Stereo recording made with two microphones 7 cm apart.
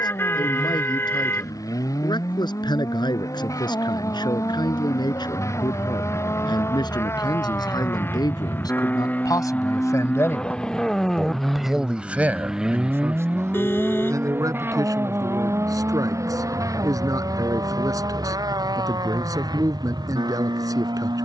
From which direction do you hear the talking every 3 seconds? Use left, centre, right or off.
left, left, left, left, right, right, right.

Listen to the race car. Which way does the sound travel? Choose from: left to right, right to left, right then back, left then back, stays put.
left to right.